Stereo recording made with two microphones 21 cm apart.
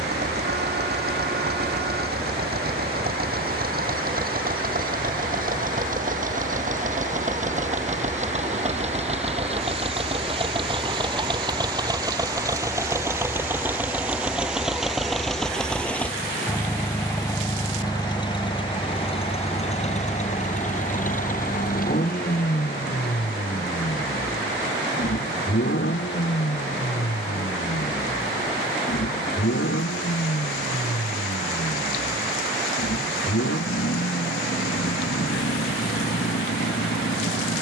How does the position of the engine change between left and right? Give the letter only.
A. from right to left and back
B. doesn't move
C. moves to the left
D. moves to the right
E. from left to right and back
C.